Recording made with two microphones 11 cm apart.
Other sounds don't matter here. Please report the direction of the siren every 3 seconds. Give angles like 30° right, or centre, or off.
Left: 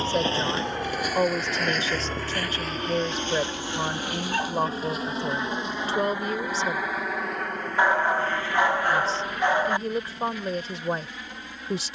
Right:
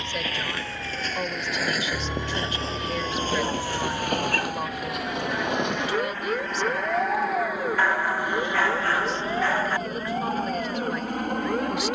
centre, 50° right, 70° right, 80° right.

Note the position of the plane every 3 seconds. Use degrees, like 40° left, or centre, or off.
50° left, 30° left, centre, 40° right.